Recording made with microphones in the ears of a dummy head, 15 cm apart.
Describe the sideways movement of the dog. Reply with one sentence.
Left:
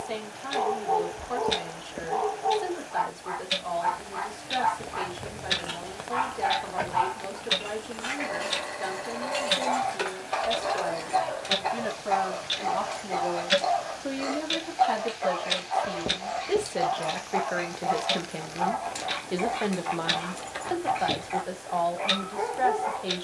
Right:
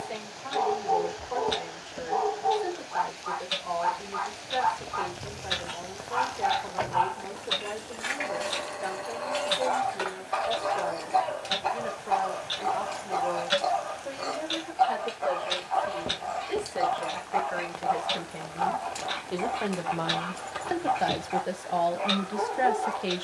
In this clip you hear the dog stay in one place.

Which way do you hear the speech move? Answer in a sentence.
In this clip you hear the speech move to the right.